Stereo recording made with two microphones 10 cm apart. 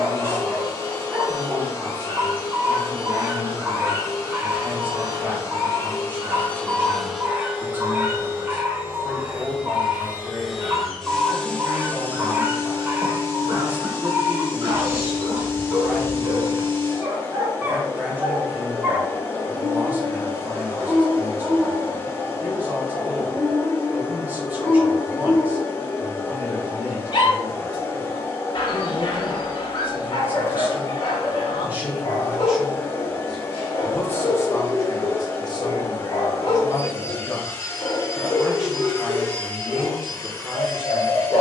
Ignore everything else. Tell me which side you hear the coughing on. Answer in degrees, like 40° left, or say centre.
50° right.